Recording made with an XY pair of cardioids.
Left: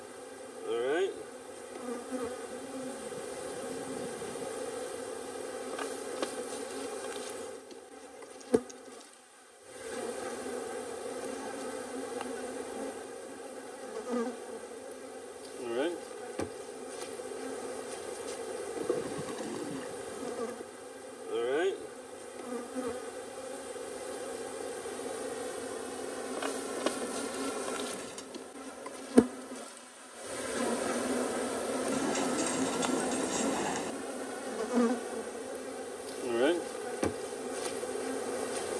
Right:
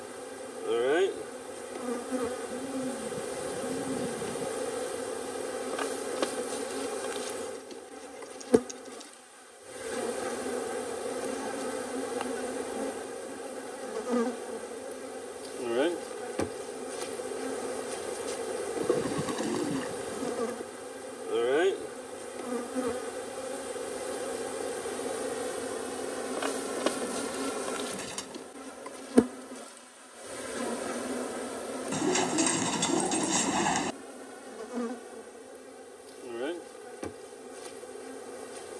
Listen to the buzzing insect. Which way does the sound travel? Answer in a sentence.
In this clip you hear the buzzing insect move from right to left.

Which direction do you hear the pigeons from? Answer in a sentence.
In this clip you hear the pigeons on the right.